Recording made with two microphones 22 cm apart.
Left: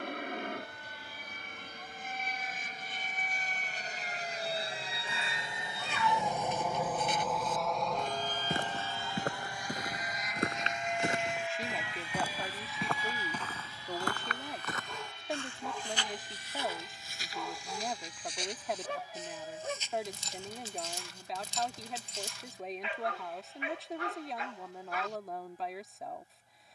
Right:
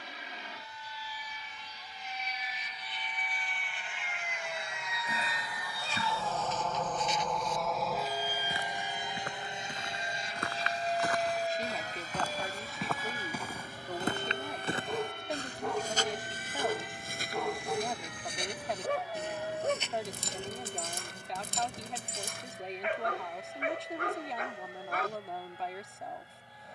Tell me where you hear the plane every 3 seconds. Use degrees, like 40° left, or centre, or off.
60° left, 40° left, centre, 30° right, 50° right, 60° right, 60° right, 70° right, 70° right.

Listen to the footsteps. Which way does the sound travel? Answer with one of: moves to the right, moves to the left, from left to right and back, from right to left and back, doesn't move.
moves to the right.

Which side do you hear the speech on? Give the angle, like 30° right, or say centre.
centre.